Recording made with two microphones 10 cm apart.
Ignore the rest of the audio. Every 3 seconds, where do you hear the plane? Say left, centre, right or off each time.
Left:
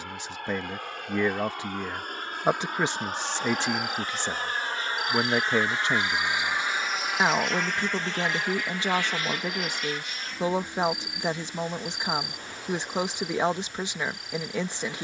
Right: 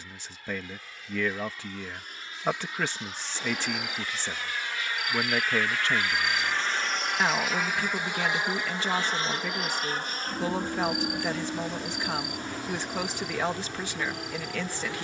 left, left, centre, right, right.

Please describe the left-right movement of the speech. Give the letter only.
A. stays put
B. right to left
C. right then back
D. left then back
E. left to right
A.